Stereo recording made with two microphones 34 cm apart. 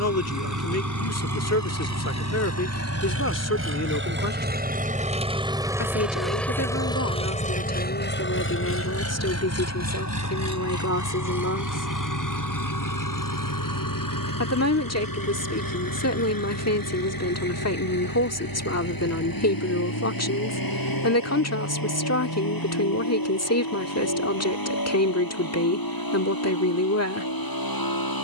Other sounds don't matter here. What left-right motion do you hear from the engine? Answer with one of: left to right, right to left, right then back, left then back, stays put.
right to left.